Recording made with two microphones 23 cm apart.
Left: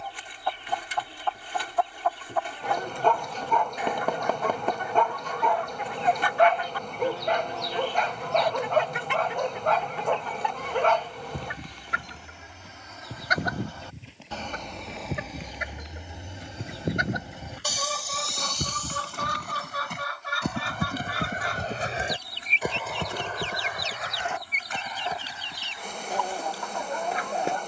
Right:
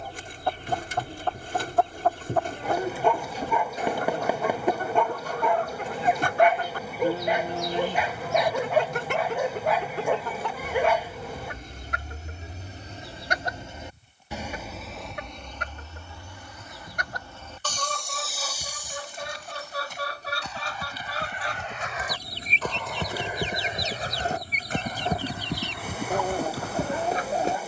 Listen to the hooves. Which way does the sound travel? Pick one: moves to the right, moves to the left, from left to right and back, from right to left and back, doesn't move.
moves to the right.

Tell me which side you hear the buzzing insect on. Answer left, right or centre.
centre.